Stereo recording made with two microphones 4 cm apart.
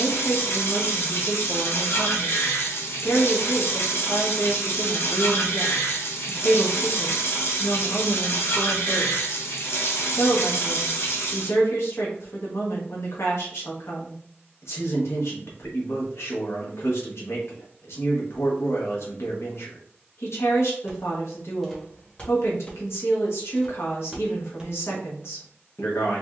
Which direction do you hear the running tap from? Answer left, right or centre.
left.